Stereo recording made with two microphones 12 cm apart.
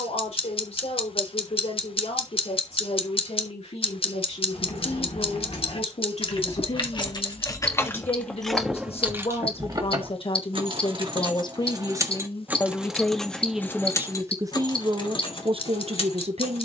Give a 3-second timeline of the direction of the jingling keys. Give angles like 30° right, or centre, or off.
off, 60° left, 20° left, 30° right, 10° left, 50° left.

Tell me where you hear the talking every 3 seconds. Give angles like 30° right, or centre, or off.
70° left, 70° left, 60° left, 50° left, centre, 60° right.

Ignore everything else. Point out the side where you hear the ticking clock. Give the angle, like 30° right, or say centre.
50° left.